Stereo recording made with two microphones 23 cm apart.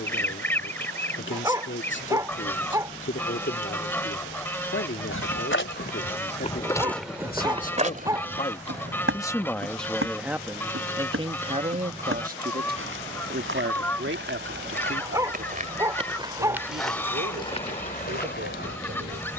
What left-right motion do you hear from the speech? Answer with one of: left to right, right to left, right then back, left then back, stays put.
left to right.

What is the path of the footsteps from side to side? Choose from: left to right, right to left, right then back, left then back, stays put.
right then back.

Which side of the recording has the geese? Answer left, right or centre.
centre.